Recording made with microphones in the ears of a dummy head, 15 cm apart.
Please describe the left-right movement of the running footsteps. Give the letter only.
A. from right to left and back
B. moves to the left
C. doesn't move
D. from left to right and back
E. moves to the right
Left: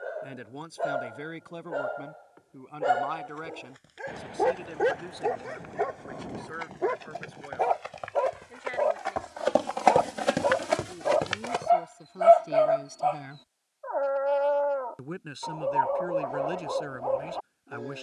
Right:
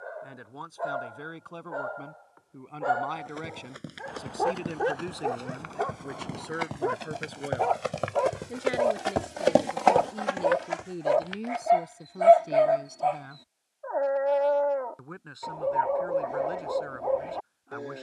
B.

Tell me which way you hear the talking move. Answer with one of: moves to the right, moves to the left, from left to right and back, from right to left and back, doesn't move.
from left to right and back.